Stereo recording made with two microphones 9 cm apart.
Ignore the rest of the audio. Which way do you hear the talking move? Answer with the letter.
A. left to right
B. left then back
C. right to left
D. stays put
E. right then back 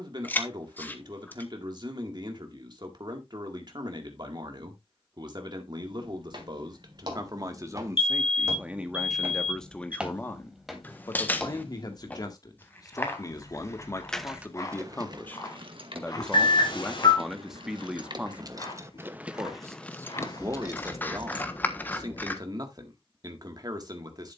B.